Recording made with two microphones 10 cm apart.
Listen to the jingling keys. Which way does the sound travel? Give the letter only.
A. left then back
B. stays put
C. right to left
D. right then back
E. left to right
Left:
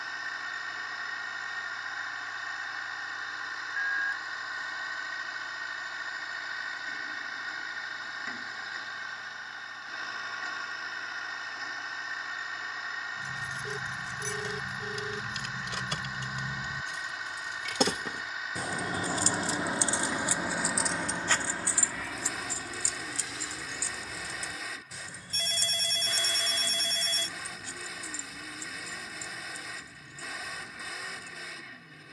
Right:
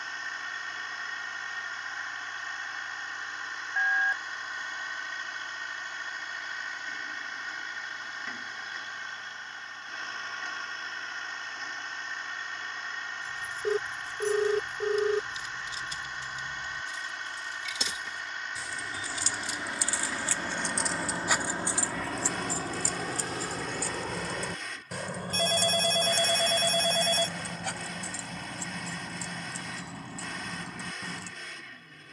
E.